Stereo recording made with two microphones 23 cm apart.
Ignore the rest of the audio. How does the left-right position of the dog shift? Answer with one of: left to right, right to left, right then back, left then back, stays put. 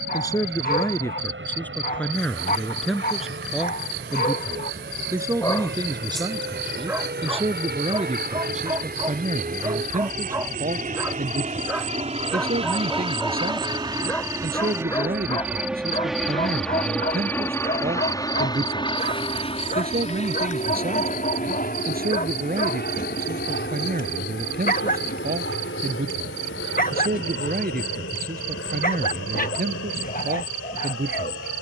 right then back.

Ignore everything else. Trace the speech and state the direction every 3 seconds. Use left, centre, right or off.
centre, centre, right, right, right, right, right, right, right, right, right.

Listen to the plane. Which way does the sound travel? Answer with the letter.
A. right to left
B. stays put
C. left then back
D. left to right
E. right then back
A.